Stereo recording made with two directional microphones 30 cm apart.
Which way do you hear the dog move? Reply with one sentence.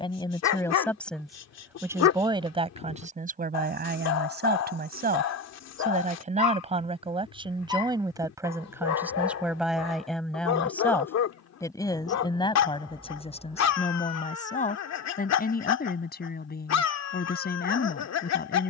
You can hear the dog stay in one place.